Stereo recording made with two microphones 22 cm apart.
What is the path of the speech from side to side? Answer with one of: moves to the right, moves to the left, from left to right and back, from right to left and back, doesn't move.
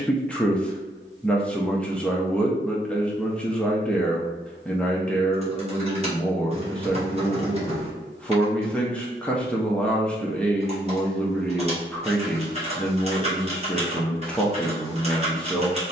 doesn't move.